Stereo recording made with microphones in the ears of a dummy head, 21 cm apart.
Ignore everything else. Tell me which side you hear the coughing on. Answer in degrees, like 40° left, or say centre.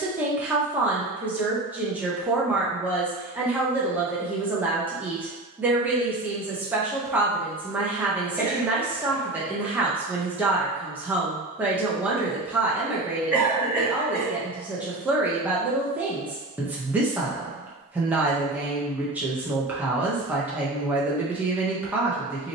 10° right.